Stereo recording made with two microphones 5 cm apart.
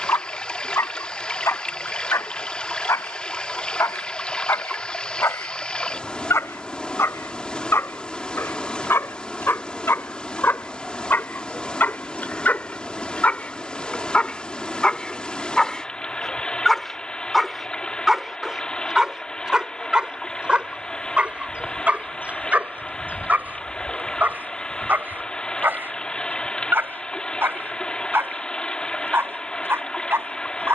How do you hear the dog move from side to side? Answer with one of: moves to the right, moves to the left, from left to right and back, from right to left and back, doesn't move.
moves to the right.